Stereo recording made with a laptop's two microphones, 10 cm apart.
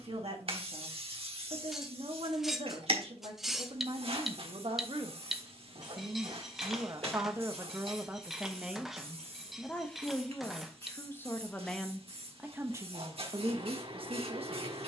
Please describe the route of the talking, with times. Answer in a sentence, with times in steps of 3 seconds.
You can hear the talking on the right from 0 s, in the centre from 9 s and on the right from 12 s.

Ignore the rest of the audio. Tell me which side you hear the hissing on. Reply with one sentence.
In this clip you hear the hissing on the right.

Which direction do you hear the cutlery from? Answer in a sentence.
In this clip you hear the cutlery in the centre.